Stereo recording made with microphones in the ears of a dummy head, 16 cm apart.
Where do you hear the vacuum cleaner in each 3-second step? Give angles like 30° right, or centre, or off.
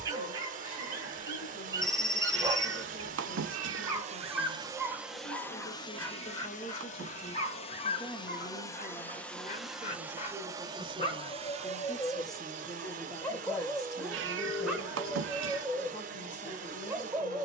50° right, 20° right, 30° left, 20° right, 40° right, 40° right.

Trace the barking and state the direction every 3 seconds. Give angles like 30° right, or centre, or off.
20° right, 10° right, 40° left, 30° left, 10° left, 10° right.